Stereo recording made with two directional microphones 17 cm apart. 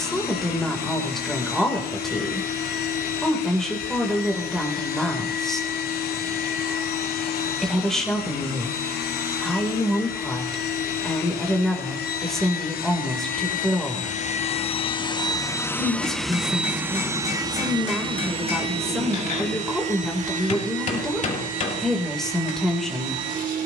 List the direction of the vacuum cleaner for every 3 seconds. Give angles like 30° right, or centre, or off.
70° left, 70° left, 70° left, 70° left, 50° left, centre, 40° right, 50° right.